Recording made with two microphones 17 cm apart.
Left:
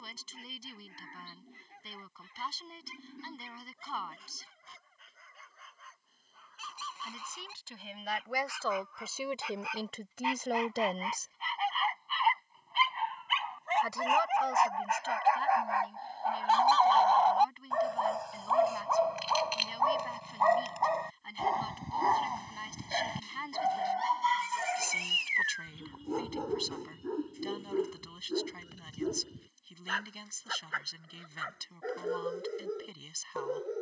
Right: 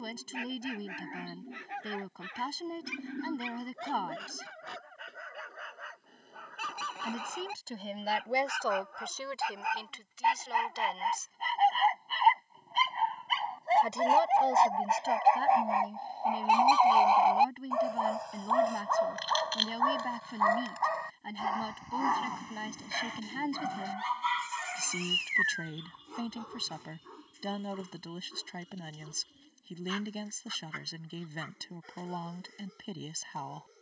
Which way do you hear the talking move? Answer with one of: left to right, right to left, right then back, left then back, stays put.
left then back.